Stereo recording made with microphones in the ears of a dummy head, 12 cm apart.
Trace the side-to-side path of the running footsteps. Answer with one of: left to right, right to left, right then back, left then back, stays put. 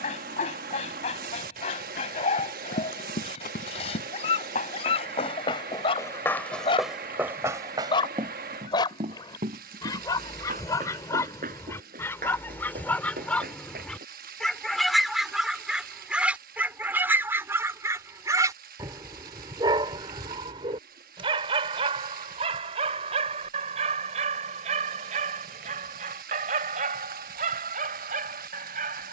left to right.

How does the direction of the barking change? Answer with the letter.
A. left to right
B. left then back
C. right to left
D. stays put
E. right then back
A.